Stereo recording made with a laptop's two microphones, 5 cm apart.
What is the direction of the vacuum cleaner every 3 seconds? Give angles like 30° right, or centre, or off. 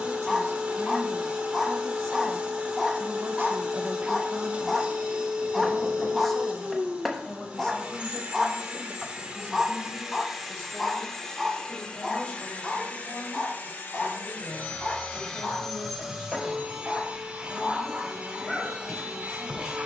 20° right, 20° right, 20° right, centre, 30° left, 10° right, 20° right.